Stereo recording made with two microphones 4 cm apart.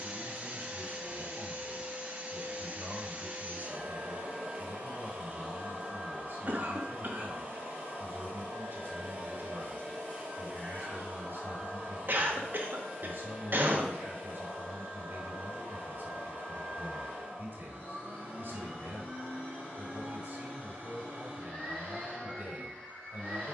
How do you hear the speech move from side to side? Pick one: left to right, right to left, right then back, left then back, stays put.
stays put.